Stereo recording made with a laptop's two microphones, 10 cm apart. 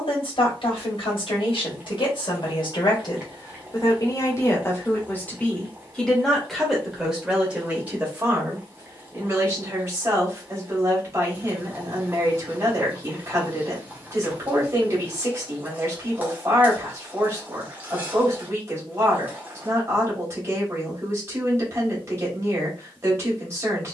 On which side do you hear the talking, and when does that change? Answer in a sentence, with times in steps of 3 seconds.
In this clip you hear the talking on the left from 0 s, in the centre from 6 s and on the right from 9 s.